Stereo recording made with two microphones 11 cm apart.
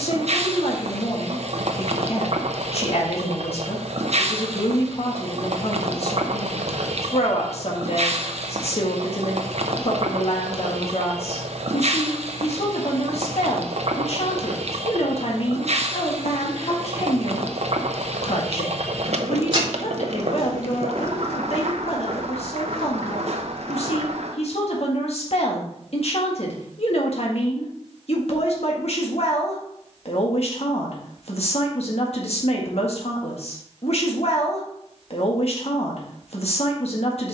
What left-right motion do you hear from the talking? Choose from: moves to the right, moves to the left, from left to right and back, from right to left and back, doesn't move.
doesn't move.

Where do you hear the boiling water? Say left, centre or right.
right.